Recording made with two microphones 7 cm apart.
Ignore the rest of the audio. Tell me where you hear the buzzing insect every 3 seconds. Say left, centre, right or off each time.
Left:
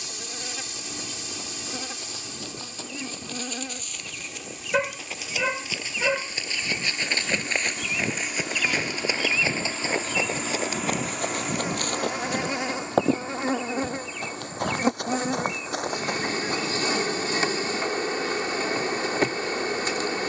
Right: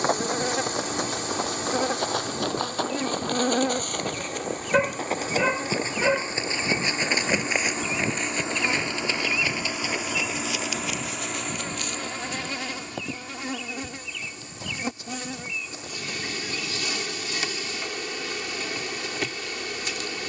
right, right, right, centre, left, left, left.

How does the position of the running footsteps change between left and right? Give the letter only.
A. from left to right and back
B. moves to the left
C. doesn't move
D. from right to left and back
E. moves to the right
B.